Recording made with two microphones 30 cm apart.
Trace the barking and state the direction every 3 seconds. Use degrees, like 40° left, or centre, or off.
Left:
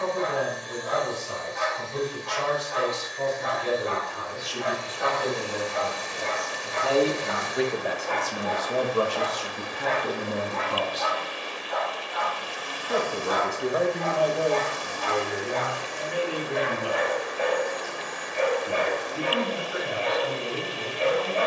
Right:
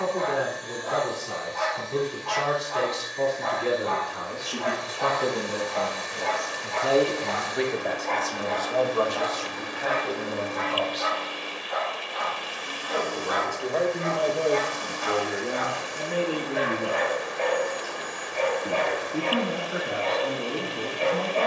20° left, 20° left, 10° left, 20° right, 30° right, centre, 20° left.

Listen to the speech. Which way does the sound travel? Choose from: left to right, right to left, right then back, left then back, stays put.
left then back.